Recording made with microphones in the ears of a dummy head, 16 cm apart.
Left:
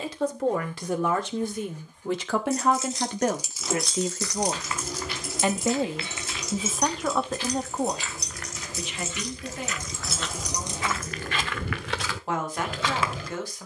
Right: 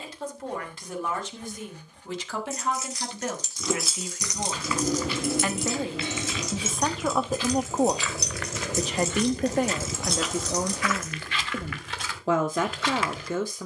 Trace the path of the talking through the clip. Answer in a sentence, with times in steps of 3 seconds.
You can hear the talking on the left from 0 s, in the centre from 6 s and on the right from 9 s.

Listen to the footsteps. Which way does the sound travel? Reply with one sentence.
In this clip you hear the footsteps move from right to left.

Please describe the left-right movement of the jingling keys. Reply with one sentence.
In this clip you hear the jingling keys move from left to right and back again.